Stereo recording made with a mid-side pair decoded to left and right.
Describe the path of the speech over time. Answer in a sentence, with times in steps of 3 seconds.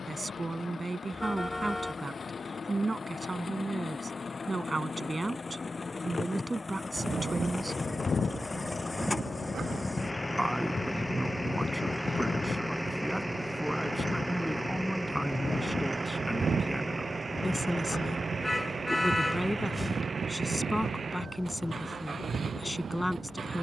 In this clip you hear the speech on the right from 0 s and in the centre from 9 s.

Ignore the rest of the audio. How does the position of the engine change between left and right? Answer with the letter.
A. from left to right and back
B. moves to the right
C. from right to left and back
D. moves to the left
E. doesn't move
B.